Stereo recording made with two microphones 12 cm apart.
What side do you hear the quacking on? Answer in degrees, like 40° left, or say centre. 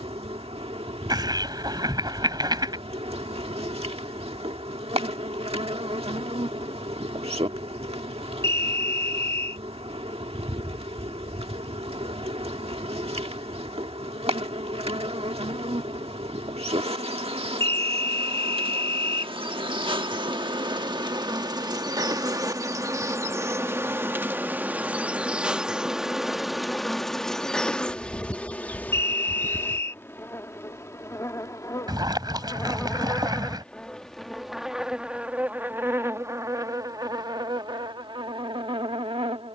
30° right.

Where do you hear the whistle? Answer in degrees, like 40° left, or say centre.
20° left.